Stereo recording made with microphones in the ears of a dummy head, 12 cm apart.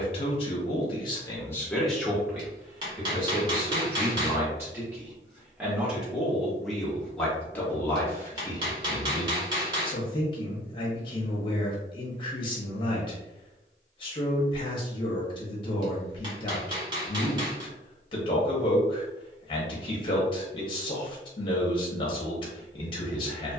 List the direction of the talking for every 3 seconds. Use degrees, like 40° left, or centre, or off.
10° left, 20° right, 10° left, 40° left, 40° left, 40° left, 40° left, 40° left.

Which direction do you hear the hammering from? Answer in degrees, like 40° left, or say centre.
30° right.